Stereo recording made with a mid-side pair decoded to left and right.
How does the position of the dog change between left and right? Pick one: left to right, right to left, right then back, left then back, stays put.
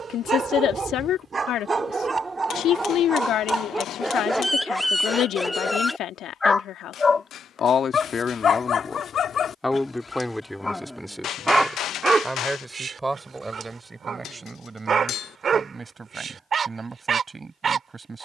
left then back.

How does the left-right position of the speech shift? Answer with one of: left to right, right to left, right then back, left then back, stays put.
left to right.